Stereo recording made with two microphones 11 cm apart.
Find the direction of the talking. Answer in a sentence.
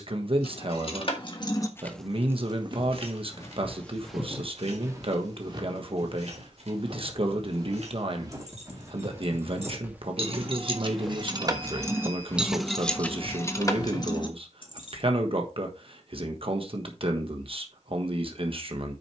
In this clip you hear the talking on the right.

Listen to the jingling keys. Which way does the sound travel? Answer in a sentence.
You can hear the jingling keys go right and come back.